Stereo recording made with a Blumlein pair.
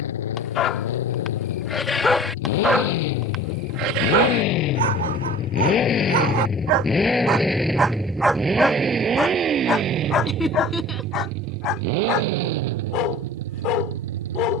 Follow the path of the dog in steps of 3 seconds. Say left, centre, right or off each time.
centre, right, right, left, left.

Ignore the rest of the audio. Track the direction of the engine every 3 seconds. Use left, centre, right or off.
left, left, centre, right, right.